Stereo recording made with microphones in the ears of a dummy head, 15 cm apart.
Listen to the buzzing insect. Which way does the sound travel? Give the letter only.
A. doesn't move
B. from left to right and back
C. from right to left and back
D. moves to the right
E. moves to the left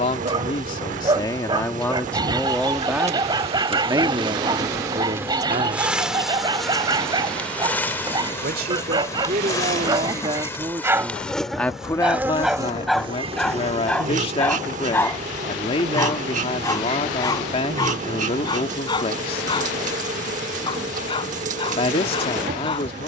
C.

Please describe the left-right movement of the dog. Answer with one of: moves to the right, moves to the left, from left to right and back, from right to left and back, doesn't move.
moves to the left.